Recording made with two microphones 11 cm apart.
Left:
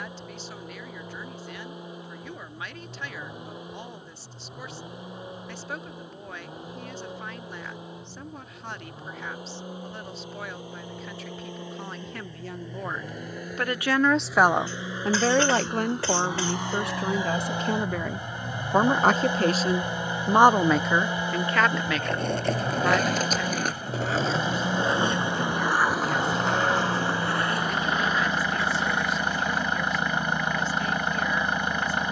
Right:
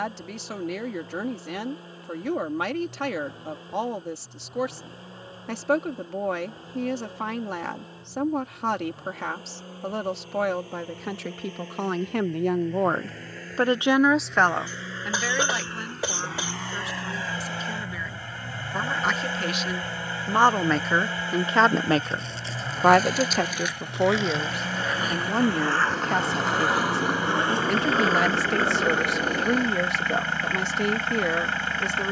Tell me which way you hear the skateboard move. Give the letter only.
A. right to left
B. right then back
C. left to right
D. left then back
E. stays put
C.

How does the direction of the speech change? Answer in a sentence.
You can hear the speech move from right to left and back again.